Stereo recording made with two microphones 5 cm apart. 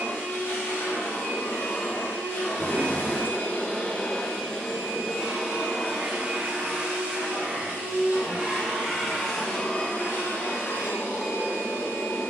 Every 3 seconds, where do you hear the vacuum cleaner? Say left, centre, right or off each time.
left, centre, right, left.